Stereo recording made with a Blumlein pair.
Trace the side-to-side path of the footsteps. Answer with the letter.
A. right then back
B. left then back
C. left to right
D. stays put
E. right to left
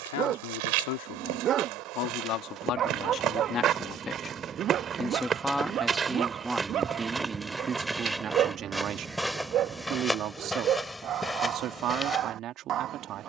E.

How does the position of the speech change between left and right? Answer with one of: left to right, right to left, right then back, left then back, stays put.
left to right.